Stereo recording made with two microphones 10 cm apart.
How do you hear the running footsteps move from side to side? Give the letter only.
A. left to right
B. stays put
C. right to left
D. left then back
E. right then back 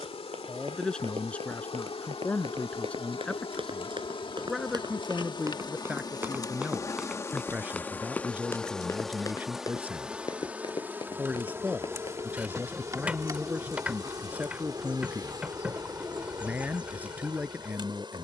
C.